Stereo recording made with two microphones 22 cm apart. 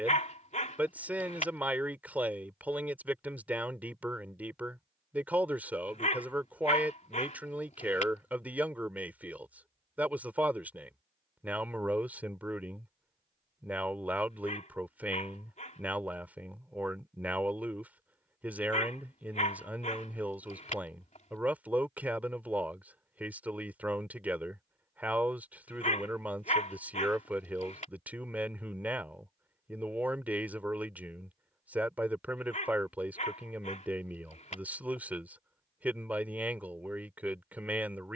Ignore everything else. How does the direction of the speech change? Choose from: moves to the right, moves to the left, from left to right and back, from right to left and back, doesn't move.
doesn't move.